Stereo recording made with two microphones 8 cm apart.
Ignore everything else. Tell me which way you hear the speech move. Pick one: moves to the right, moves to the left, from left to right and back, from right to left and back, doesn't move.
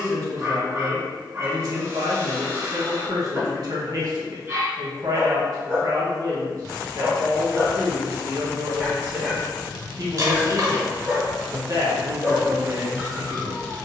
doesn't move.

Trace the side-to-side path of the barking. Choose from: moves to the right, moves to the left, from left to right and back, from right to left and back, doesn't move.
doesn't move.